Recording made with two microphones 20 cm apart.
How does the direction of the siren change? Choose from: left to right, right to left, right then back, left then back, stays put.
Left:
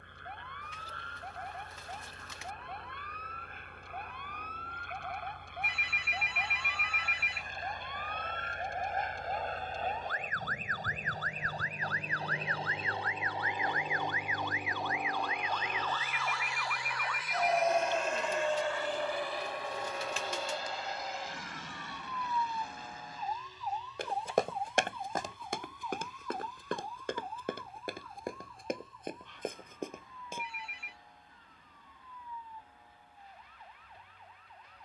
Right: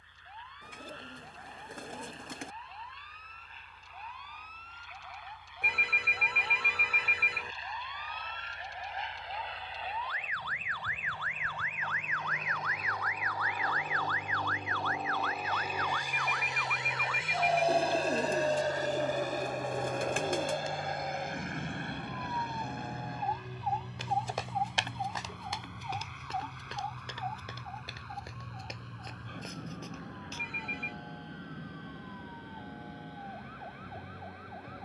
left to right.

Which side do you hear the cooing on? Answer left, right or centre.
right.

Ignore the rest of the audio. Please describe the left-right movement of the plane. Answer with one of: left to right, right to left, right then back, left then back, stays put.
left to right.